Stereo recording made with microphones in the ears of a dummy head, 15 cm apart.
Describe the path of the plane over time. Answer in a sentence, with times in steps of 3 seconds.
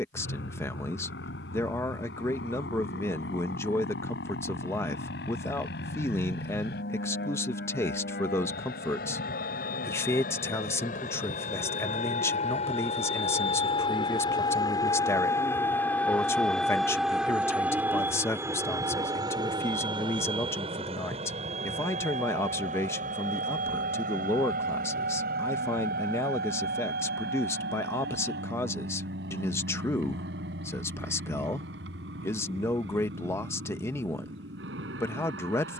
In this clip you hear the plane on the left from 0 s, in the centre from 15 s and on the right from 18 s.